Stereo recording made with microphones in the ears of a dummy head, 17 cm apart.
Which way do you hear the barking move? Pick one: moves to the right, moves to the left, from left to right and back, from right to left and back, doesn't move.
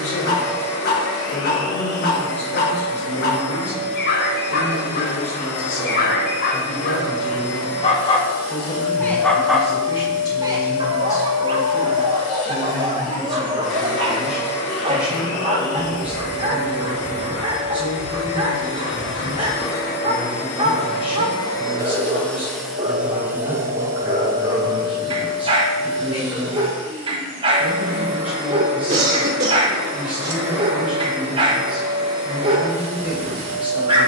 moves to the right.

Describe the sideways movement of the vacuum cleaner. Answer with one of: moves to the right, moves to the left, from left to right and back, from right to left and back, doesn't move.
moves to the right.